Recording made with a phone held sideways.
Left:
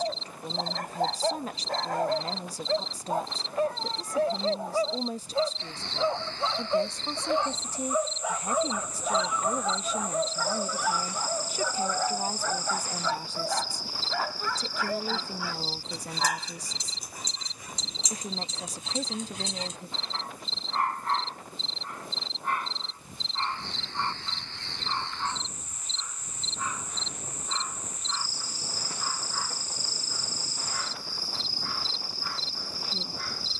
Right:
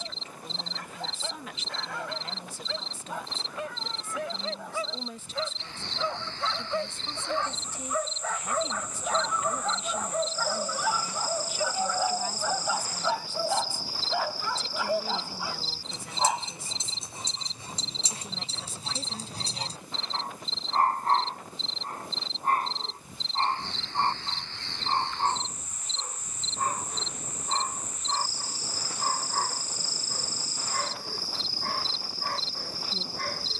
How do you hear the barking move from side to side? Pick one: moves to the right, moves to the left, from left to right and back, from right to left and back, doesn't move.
moves to the right.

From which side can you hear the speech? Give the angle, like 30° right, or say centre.
40° left.